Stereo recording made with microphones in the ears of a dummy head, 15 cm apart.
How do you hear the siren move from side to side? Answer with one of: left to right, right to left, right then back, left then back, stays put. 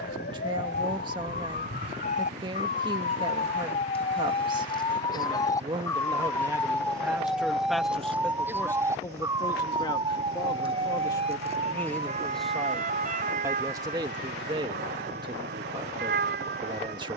left to right.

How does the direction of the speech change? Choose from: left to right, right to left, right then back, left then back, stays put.
left then back.